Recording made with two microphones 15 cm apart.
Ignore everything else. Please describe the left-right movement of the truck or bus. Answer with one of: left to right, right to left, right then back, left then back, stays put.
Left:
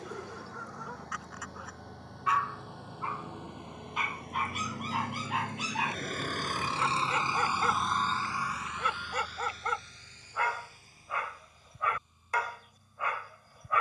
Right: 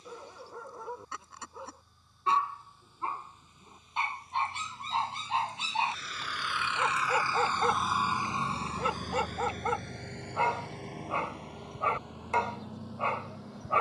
left to right.